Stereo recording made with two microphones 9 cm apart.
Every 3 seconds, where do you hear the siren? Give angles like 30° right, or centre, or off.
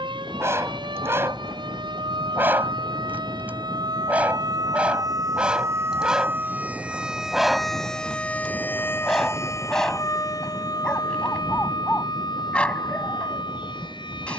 70° right, 50° right, centre, 40° left, 60° left.